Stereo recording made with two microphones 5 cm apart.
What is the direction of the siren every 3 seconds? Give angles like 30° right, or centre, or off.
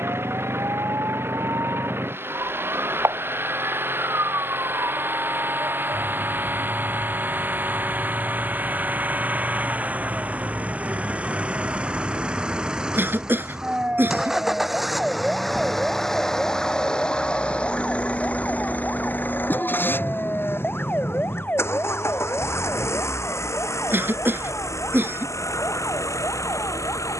70° right, 70° right, 60° right, 40° right, 20° right, centre, 20° left, 40° left, 50° left.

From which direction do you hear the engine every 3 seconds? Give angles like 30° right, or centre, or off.
50° right, 40° right, 40° right, 30° right, 10° right, 10° left, 40° left, 60° left, 70° left.